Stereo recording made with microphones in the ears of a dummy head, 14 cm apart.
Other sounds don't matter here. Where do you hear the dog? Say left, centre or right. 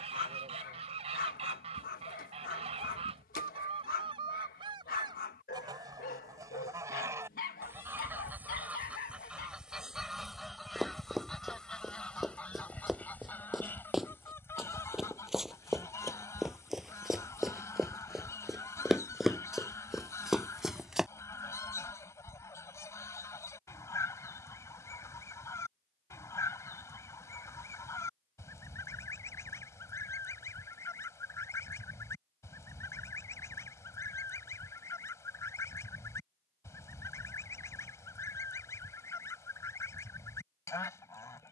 left.